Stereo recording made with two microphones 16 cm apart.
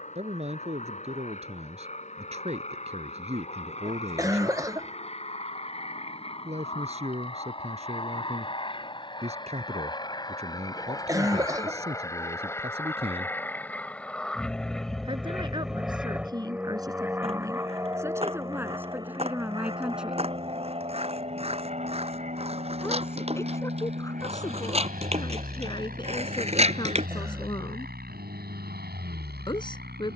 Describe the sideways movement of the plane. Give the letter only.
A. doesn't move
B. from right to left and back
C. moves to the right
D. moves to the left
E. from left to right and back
C.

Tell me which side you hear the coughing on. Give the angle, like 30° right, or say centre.
20° right.